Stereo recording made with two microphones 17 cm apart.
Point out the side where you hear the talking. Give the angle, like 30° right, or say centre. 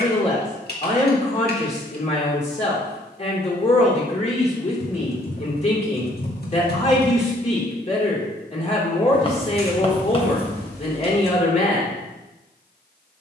40° left.